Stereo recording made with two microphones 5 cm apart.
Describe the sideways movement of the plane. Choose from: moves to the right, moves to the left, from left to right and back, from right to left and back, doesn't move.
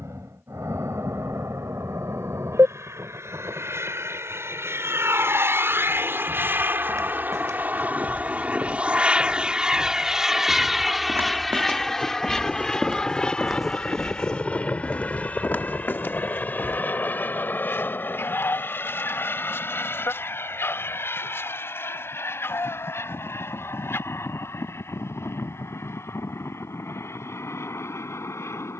moves to the left.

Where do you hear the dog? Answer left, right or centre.
left.